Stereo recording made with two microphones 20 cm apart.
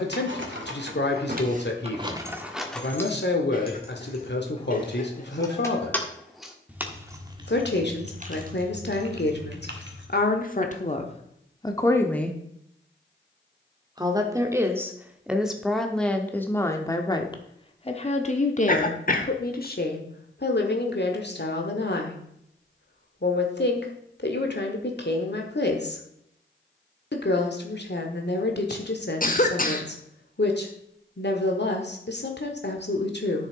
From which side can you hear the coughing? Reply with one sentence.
In this clip you hear the coughing on the left.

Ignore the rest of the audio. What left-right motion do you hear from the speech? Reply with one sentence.
You can hear the speech move from left to right and back again.